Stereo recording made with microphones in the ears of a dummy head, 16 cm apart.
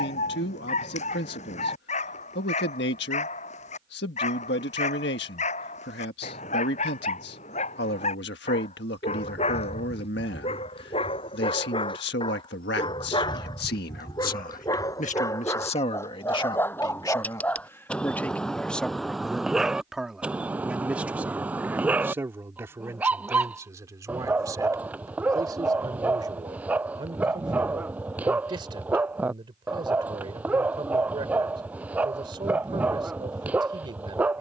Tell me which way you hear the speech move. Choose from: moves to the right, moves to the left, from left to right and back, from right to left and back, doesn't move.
moves to the right.